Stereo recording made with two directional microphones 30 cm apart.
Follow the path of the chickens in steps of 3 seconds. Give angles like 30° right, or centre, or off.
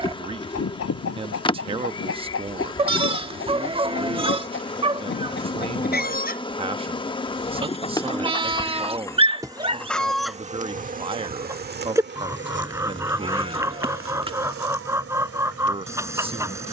50° left, 40° left, 20° left, centre, 10° right, 10° right.